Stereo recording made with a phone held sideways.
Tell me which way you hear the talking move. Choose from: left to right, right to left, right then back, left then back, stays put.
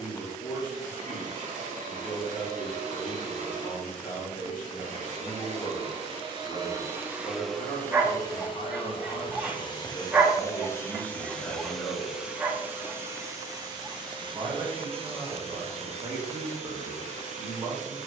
left to right.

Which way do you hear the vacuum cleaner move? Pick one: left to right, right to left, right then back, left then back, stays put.
left then back.